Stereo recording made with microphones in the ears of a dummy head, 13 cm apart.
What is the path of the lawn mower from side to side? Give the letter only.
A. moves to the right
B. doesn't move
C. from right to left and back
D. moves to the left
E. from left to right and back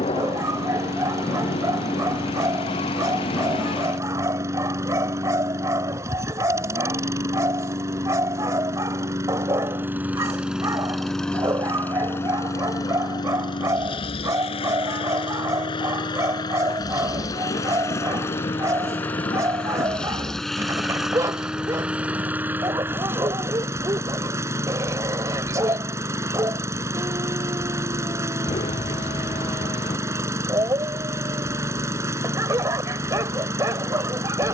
C.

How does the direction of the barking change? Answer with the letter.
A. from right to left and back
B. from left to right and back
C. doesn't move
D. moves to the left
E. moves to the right
C.